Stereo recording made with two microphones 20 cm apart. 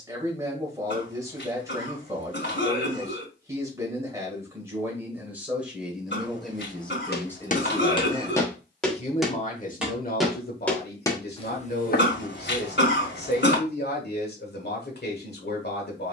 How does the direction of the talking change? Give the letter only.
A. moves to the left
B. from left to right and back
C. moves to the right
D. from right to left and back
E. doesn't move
A.